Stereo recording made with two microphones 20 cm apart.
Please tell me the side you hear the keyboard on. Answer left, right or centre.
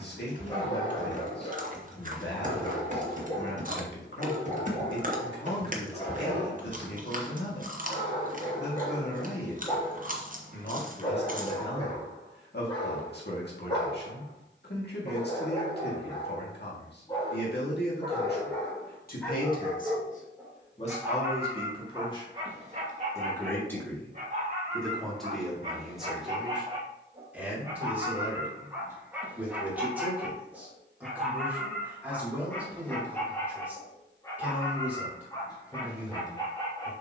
right.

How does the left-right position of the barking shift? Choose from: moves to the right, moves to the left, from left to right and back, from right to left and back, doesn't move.
from left to right and back.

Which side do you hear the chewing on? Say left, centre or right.
right.